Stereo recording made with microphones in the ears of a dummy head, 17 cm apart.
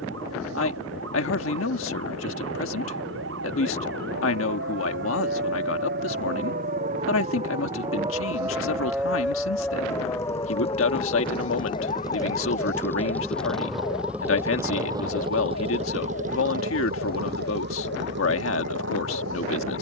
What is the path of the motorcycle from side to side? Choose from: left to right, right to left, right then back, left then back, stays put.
left to right.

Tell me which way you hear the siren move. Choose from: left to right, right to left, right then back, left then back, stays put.
right to left.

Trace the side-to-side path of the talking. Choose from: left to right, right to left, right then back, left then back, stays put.
stays put.